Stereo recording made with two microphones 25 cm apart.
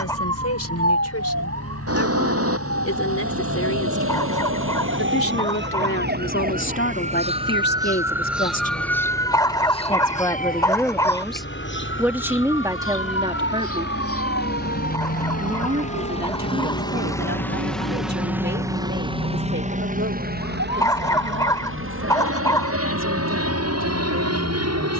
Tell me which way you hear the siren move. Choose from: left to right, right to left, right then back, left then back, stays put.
right to left.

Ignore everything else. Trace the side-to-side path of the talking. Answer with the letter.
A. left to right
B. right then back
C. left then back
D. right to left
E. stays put
A.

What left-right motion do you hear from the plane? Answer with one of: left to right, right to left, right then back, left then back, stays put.
left to right.